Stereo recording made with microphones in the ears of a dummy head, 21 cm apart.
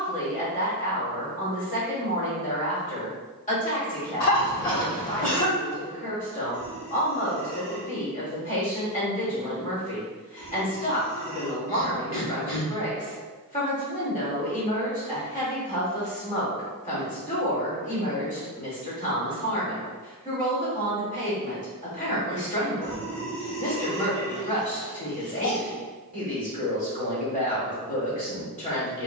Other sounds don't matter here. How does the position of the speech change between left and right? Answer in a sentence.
In this clip you hear the speech stay put.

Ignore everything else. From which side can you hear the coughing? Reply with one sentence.
In this clip you hear the coughing on the left.